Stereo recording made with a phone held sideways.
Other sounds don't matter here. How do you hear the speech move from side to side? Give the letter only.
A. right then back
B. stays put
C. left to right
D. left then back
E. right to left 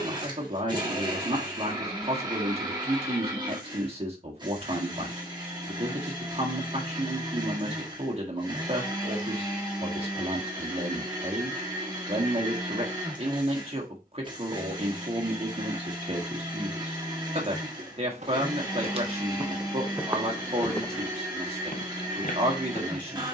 B.